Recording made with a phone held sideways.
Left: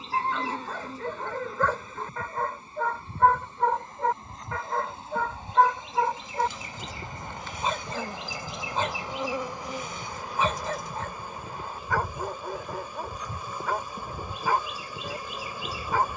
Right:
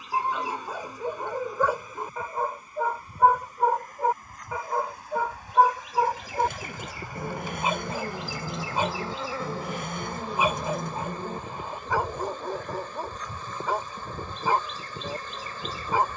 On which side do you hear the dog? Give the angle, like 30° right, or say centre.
10° right.